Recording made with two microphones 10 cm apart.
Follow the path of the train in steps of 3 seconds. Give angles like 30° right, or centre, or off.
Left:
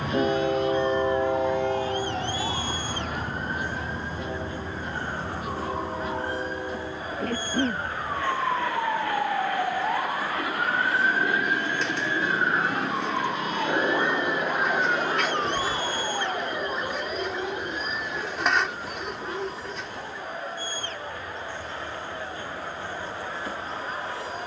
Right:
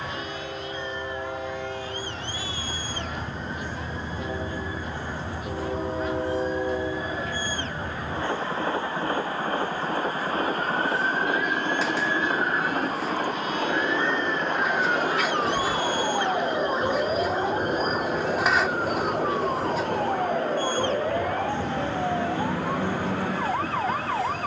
30° left, centre, 30° right, 40° right, 40° right, 50° right, 50° right, 50° right.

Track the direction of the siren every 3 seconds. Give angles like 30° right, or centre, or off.
60° left, 60° left, 50° left, 40° left, 20° left, 20° right, 50° right, 70° right.